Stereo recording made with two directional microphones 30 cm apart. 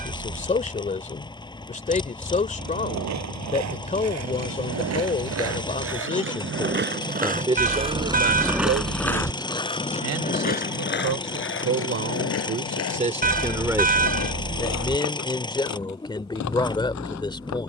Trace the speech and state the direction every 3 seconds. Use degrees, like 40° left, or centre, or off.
20° left, 20° left, 20° right, 60° right, 20° right, 10° left.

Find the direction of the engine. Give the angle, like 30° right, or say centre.
10° left.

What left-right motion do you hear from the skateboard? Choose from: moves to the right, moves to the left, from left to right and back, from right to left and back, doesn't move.
moves to the left.